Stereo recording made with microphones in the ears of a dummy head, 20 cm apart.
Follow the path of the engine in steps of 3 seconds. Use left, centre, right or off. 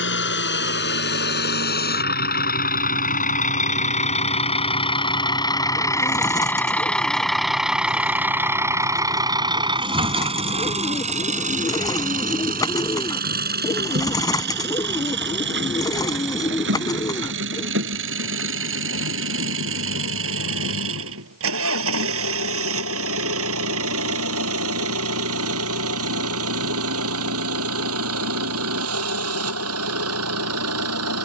left, left, centre, right, right, right, right, right, right, right, right.